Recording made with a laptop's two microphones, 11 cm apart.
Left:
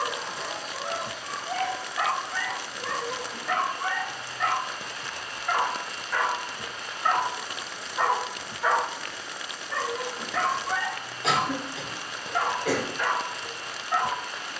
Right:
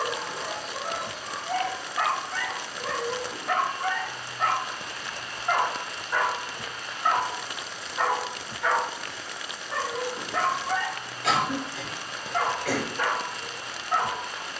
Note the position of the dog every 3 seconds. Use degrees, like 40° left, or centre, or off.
50° right, 40° right, centre, 40° right, 50° right.